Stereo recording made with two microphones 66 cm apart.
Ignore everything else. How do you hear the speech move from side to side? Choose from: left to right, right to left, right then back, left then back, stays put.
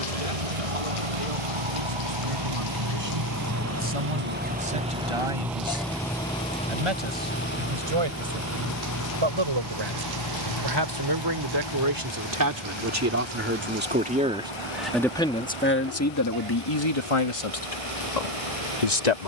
right to left.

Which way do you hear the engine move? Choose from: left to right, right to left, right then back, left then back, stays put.
right to left.